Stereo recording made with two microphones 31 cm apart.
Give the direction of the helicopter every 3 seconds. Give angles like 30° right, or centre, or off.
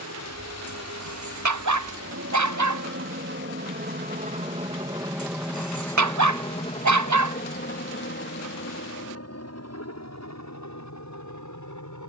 60° right, 20° right, 30° left, 50° left.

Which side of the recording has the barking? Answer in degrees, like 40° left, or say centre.
60° right.